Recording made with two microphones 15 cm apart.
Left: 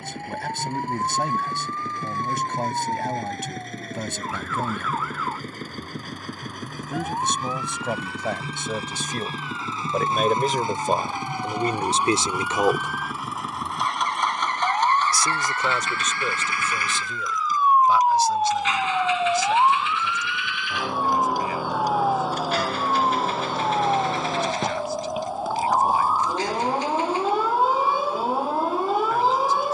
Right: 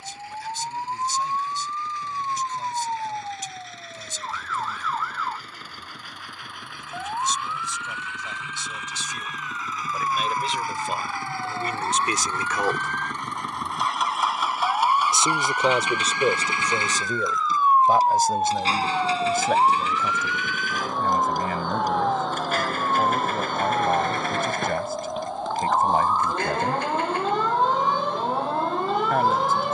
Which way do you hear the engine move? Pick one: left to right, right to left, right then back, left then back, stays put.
left to right.